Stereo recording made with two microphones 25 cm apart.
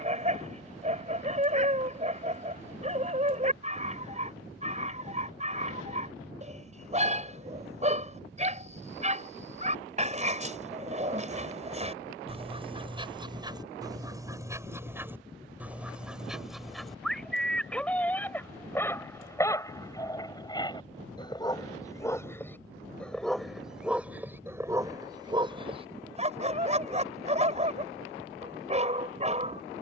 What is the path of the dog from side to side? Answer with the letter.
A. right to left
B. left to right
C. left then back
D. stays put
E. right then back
C.